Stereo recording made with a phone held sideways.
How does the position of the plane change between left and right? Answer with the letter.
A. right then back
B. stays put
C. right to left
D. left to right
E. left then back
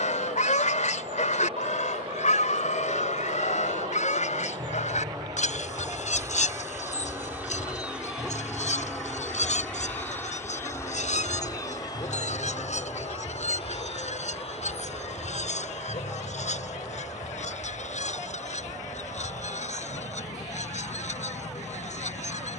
C.